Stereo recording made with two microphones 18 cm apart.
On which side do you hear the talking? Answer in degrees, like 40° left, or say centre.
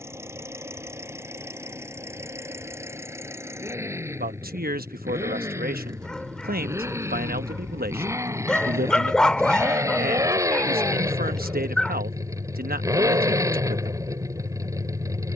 60° right.